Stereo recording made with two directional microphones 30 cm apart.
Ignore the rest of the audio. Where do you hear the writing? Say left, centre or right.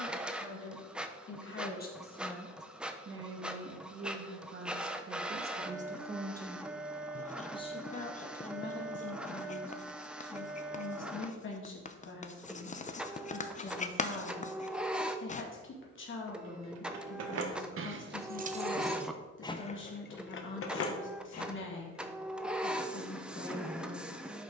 left.